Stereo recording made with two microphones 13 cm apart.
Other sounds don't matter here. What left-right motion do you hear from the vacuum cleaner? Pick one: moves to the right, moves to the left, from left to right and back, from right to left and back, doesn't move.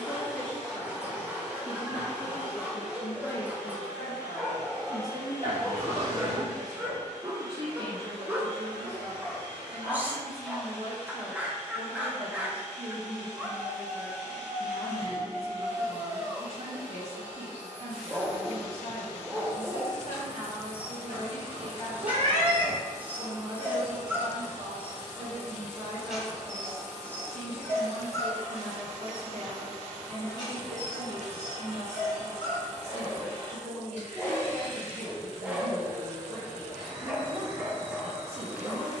doesn't move.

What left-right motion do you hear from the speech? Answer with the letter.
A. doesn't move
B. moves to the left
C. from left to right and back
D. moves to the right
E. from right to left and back
D.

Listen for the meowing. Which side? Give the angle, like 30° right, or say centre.
60° right.